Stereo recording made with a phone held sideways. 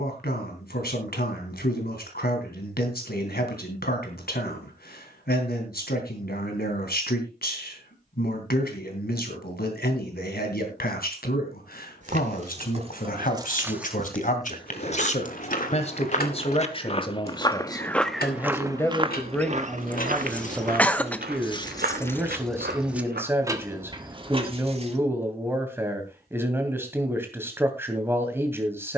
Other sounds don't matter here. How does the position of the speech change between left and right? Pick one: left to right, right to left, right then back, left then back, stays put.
left to right.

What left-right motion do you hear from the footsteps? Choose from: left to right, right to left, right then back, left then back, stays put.
left to right.